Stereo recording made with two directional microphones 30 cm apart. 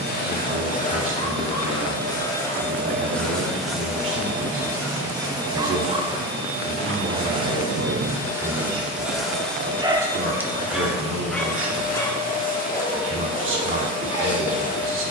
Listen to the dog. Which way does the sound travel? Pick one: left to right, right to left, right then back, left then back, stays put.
right then back.